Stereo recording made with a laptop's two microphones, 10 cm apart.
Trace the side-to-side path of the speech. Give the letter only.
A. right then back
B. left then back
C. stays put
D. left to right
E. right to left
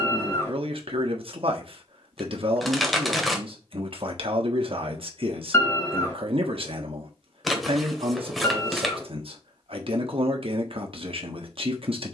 C.